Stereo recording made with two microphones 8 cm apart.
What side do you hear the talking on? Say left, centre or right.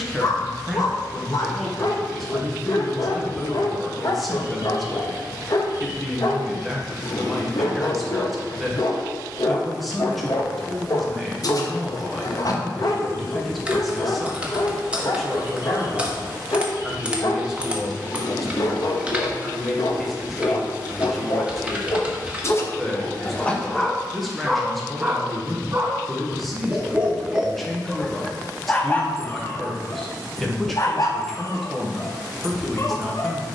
centre.